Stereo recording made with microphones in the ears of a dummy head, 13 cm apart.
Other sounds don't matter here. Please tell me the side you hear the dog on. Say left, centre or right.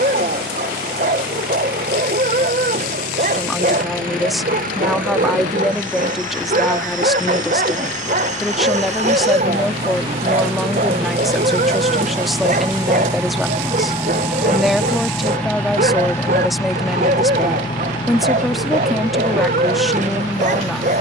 right.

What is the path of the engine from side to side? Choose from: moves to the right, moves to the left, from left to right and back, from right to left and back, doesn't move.
moves to the left.